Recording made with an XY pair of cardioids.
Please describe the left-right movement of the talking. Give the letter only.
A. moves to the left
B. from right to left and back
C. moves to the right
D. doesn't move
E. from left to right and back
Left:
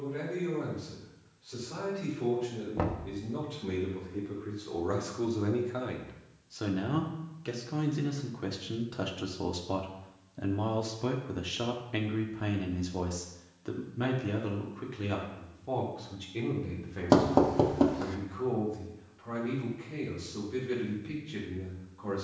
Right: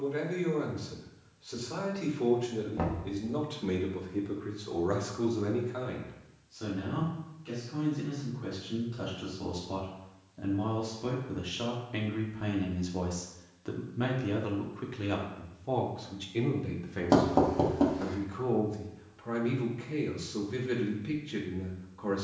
B.